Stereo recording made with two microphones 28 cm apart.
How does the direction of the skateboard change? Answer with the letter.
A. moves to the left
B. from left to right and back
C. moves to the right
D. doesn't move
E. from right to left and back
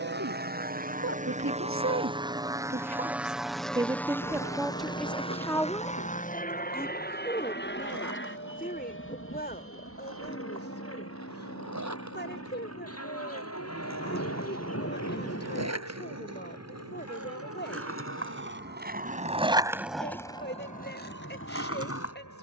A.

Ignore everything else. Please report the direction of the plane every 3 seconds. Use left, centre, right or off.
right, centre, left, left, left, left, left, left.